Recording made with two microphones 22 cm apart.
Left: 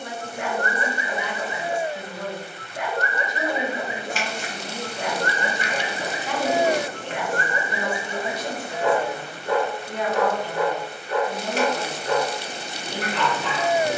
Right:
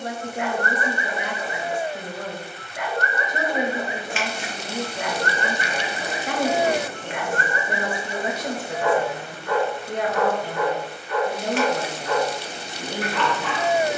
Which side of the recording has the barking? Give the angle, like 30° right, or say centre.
30° left.